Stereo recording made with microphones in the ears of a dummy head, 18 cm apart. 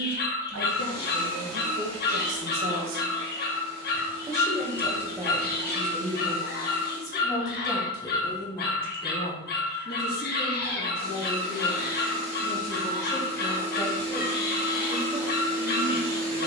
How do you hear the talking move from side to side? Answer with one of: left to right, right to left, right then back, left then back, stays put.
left then back.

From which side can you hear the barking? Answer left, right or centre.
left.